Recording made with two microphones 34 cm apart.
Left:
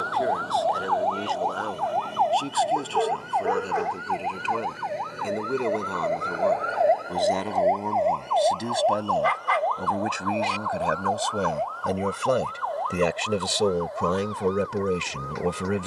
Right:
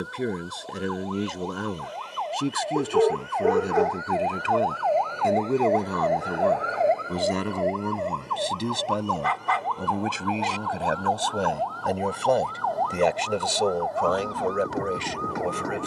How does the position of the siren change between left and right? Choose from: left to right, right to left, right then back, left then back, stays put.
left to right.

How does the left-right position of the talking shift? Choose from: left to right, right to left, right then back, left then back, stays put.
right to left.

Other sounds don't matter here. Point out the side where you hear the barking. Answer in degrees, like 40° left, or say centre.
50° right.